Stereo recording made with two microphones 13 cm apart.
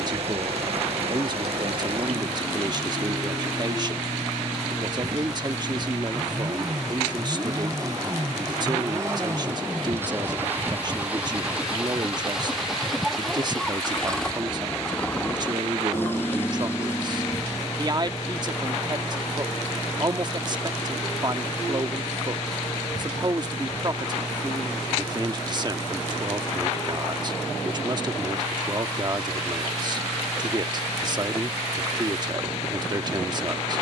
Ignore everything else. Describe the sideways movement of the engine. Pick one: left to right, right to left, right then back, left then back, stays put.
right to left.